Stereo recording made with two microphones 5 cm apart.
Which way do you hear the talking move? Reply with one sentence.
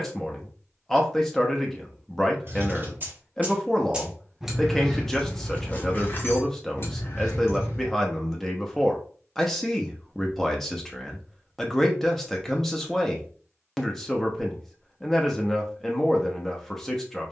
In this clip you hear the talking stay in one place.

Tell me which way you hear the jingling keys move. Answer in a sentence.
In this clip you hear the jingling keys travel towards the left.